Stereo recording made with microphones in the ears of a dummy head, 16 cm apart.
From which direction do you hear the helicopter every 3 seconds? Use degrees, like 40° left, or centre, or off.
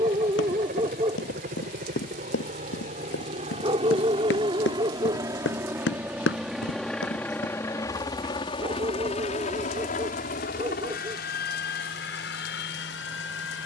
50° right, 20° right, 10° left, 50° left, 60° left.